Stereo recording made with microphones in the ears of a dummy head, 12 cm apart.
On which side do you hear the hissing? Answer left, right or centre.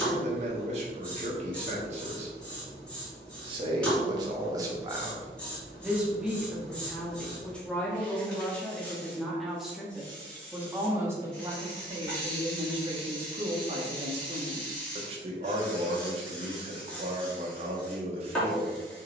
centre.